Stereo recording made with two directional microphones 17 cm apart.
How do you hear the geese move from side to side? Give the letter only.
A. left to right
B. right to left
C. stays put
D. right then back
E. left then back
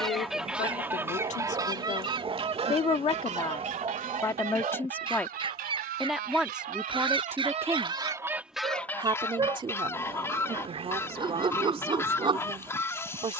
D.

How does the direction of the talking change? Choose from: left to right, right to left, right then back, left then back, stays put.
left to right.